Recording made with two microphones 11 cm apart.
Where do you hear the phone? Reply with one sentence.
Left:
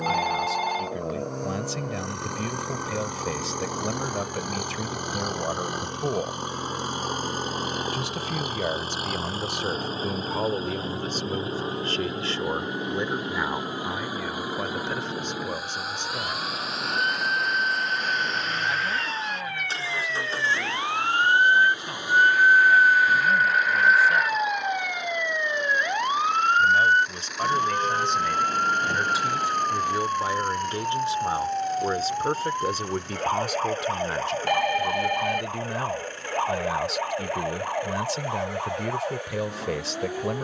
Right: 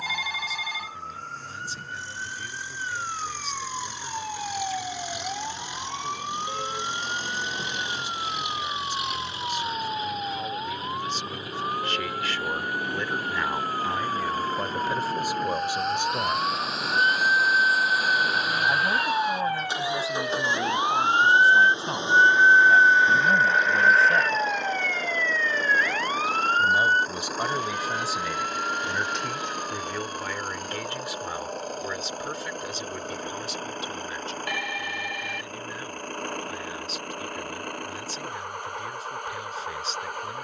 You can hear the phone on the left.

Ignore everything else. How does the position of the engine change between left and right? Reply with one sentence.
You can hear the engine travel towards the right.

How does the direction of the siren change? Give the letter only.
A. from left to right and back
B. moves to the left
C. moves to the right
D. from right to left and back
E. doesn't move
B.